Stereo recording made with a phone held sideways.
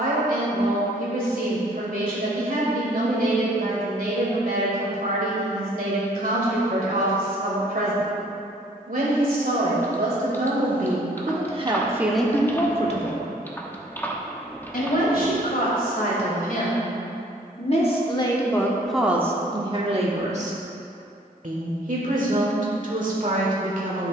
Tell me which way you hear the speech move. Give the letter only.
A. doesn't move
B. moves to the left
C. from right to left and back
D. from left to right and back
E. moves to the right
C.